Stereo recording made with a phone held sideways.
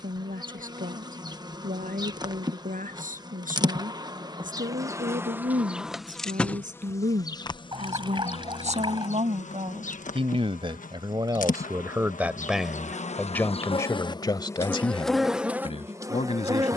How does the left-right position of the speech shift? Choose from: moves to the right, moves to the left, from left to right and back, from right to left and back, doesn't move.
moves to the left.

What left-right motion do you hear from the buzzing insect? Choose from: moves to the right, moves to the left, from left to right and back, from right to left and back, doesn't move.
from right to left and back.